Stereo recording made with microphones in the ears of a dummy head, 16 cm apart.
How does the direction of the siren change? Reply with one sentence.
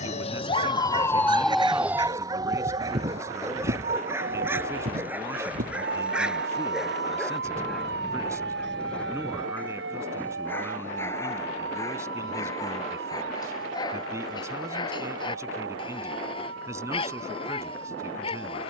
In this clip you hear the siren travel towards the right.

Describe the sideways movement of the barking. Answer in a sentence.
You can hear the barking move from right to left.